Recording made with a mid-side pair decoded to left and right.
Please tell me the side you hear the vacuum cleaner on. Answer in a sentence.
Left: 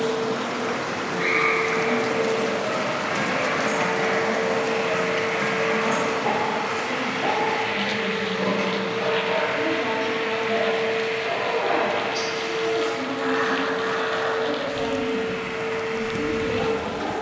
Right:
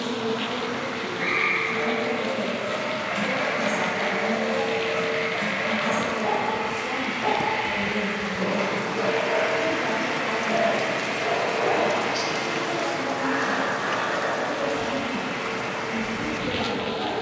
In this clip you hear the vacuum cleaner on the right.